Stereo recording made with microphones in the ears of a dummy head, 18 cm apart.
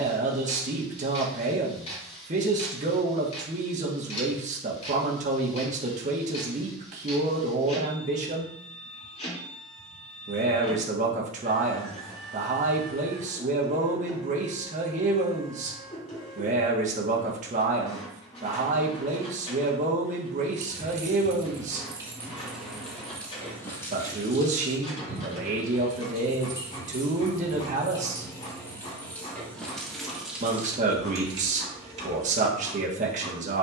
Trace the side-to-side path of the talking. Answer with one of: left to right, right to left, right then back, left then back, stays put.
stays put.